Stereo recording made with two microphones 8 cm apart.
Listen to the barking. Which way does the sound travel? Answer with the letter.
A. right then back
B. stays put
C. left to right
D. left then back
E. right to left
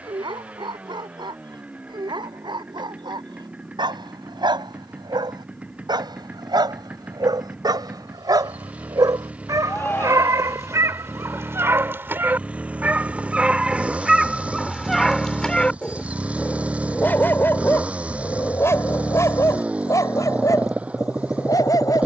E.